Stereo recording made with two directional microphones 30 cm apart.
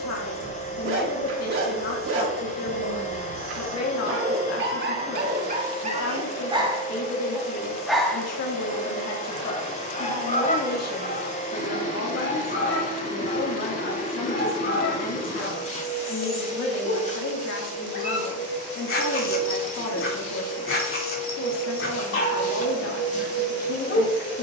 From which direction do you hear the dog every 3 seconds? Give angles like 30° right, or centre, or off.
50° right, 40° right, 10° right, 30° left, 40° left, 40° left, 40° left, 40° left.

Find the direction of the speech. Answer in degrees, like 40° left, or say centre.
60° left.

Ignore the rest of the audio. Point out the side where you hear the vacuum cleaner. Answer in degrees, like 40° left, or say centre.
20° left.